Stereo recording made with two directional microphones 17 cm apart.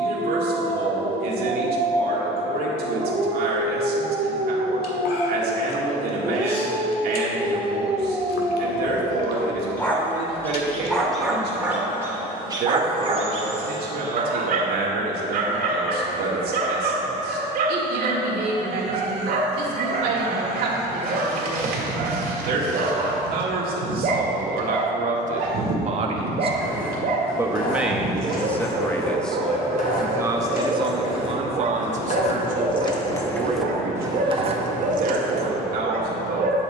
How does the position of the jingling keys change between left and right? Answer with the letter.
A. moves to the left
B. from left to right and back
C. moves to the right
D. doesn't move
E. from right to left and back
C.